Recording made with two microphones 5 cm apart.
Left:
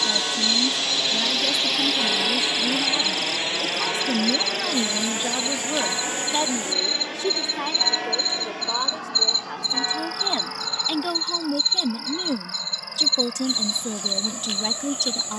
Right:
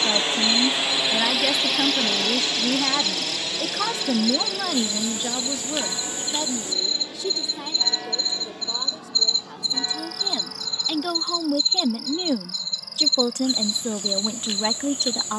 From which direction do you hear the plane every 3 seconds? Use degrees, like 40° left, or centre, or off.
centre, 40° left, 60° left, 70° left, 70° left.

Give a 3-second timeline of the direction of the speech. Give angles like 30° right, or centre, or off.
50° right, 10° right, 50° left, 20° left, 30° right.